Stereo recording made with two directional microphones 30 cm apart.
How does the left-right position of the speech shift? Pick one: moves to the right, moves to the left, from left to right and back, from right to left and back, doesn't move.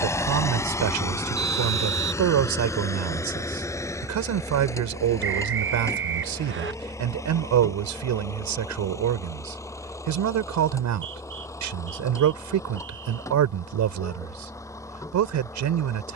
doesn't move.